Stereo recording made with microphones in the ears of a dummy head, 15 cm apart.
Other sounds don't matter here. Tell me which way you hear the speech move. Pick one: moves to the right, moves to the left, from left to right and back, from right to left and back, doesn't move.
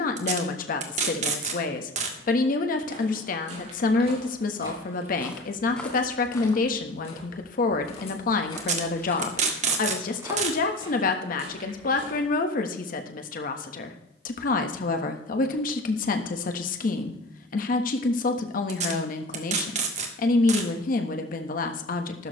doesn't move.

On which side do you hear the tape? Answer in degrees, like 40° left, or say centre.
40° right.